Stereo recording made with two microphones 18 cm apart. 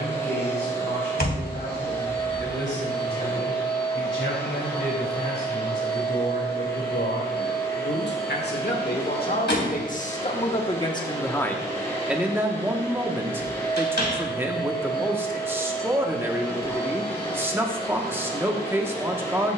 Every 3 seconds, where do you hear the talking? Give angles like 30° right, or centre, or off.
80° left, 80° left, 70° left, 30° left, 10° right, 10° right, 10° right.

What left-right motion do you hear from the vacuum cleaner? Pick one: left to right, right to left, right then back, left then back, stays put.
stays put.